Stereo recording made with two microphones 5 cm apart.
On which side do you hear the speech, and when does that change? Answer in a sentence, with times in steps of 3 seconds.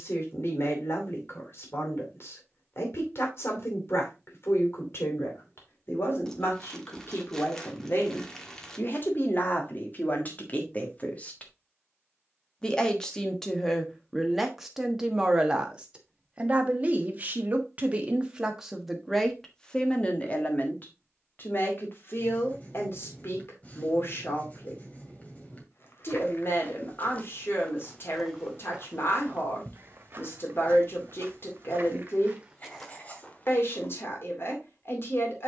In this clip you hear the speech on the left from 0 s, in the centre from 12 s, on the right from 15 s, in the centre from 18 s and on the left from 21 s.